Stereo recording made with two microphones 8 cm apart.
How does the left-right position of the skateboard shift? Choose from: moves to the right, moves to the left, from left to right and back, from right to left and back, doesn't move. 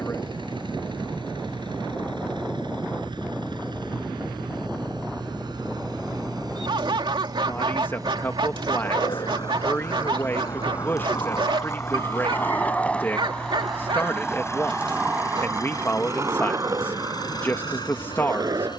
moves to the right.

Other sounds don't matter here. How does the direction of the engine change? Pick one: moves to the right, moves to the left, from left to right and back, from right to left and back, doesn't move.
moves to the left.